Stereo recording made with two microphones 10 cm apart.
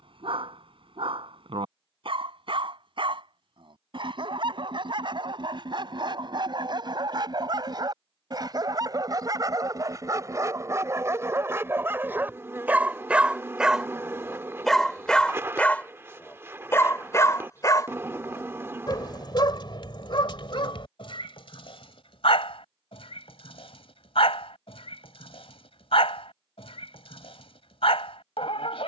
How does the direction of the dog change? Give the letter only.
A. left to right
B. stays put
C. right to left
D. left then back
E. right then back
C.